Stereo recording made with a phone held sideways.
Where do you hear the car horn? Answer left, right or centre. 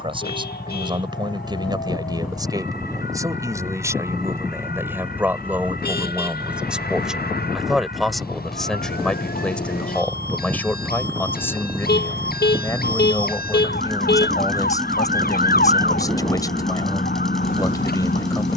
left.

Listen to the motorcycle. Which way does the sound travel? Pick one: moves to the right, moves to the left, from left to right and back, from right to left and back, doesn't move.
doesn't move.